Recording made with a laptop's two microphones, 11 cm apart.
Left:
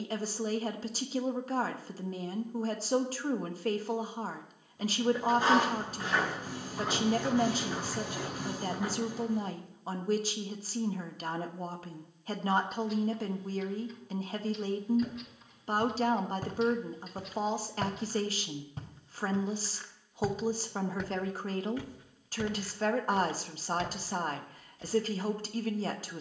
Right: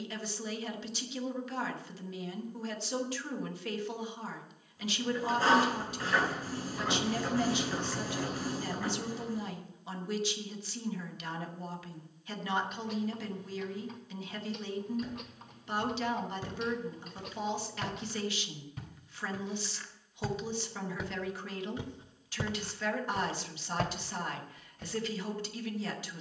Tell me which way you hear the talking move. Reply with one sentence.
You can hear the talking stay put.